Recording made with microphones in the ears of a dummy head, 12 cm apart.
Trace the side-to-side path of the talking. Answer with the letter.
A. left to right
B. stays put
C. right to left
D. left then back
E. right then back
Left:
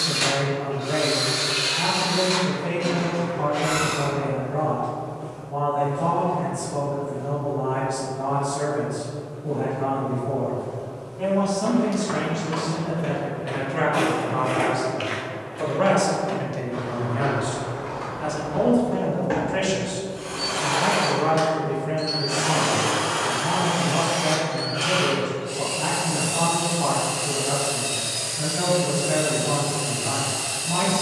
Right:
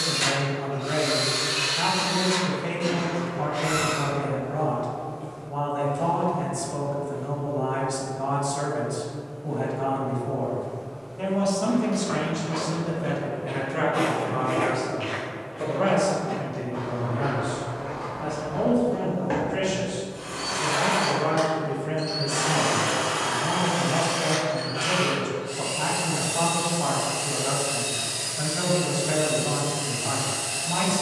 D.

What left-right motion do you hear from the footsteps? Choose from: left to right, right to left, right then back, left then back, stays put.
left then back.